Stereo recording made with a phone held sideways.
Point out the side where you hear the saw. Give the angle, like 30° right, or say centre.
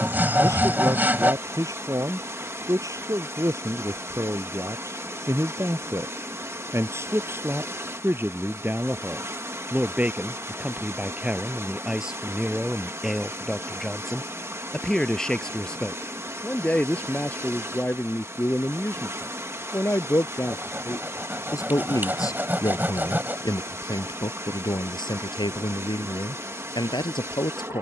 10° right.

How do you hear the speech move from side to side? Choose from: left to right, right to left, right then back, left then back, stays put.
right to left.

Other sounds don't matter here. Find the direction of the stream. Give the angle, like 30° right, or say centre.
20° right.